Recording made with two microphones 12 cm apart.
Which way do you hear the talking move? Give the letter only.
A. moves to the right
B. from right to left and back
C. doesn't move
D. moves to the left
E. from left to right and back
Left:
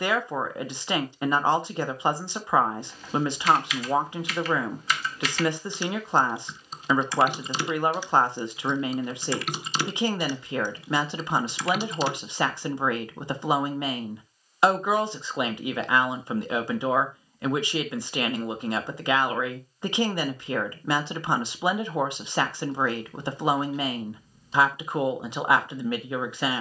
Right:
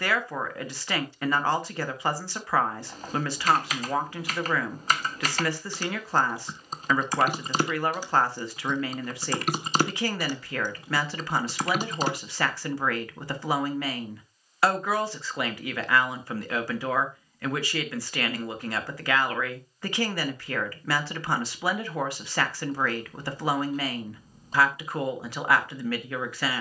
C.